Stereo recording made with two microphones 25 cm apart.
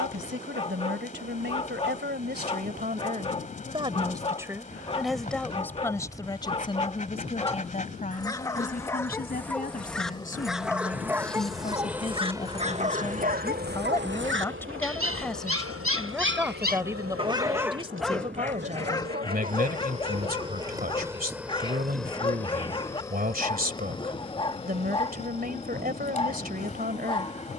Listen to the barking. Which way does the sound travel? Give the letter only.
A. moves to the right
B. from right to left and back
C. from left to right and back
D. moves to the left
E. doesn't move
C.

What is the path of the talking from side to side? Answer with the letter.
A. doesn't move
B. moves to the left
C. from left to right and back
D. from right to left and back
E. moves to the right
D.